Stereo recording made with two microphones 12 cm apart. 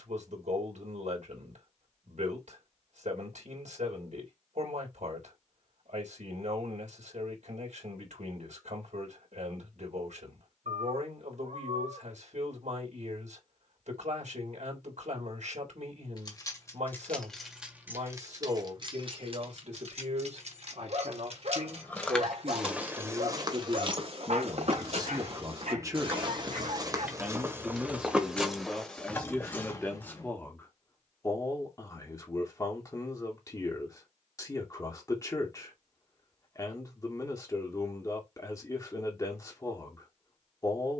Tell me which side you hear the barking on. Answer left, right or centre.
right.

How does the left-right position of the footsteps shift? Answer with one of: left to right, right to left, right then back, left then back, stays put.
right then back.